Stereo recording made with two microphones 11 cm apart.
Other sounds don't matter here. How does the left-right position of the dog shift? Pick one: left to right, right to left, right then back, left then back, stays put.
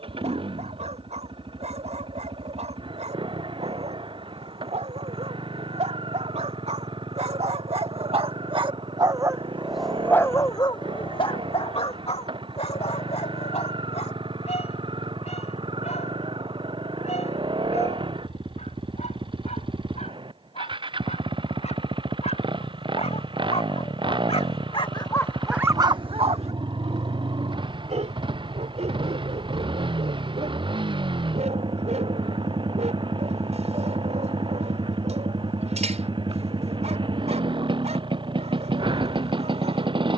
left then back.